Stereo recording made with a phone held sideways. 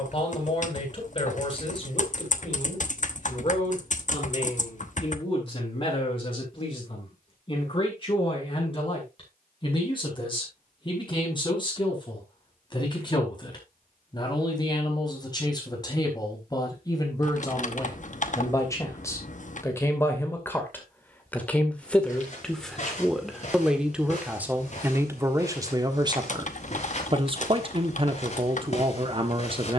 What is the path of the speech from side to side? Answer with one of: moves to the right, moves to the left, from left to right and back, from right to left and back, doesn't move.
moves to the right.